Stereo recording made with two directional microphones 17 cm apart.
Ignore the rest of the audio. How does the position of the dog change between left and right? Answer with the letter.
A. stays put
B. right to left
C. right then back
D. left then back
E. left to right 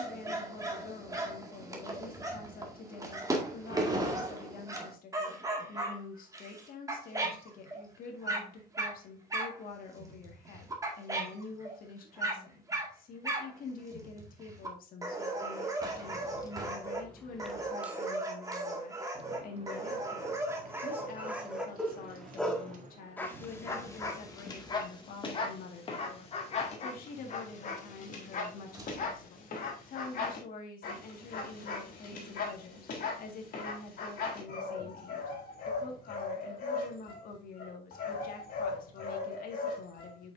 B.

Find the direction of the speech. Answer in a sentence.
In this clip you hear the speech on the left.